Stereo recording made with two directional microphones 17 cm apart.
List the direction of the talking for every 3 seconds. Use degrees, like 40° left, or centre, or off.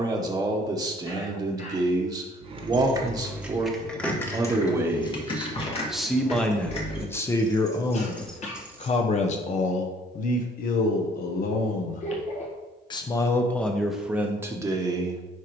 20° right, 20° right, 20° left, 50° left, centre.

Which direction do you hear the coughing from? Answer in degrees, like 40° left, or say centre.
40° left.